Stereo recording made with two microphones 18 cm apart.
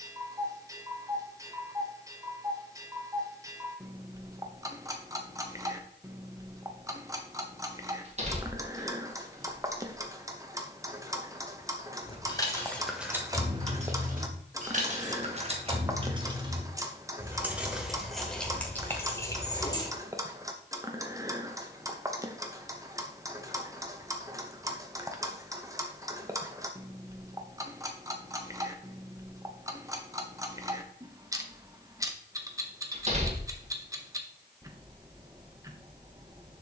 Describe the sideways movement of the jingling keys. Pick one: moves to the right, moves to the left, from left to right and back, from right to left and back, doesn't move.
from left to right and back.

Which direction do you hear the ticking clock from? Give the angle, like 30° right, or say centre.
20° right.